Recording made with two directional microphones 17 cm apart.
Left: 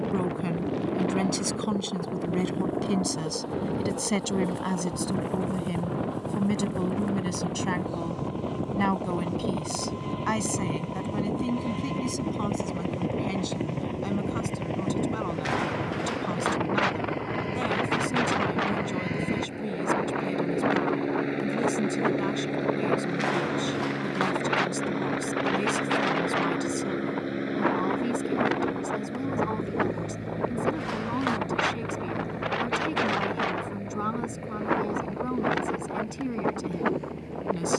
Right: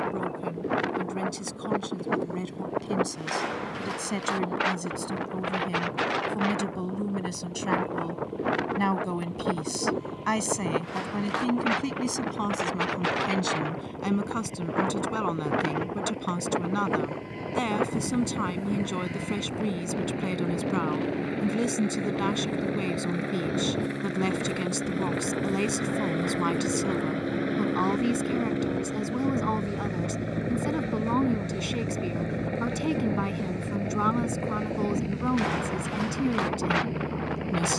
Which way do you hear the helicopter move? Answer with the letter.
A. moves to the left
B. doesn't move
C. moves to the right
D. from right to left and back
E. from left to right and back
C.